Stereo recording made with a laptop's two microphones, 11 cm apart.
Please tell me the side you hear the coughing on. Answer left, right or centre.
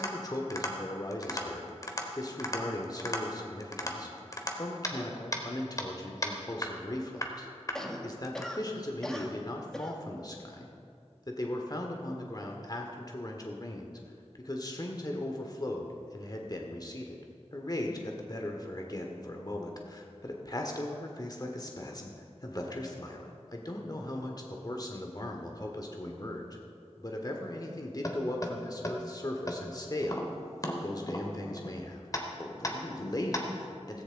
centre.